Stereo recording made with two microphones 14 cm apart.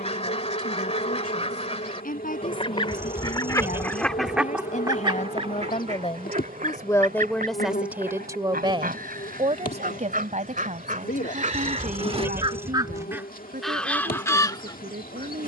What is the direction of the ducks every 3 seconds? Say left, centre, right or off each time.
left, centre, right, right, centre.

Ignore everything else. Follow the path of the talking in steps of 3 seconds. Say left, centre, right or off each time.
left, left, centre, right, right.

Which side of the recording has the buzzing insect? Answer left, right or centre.
left.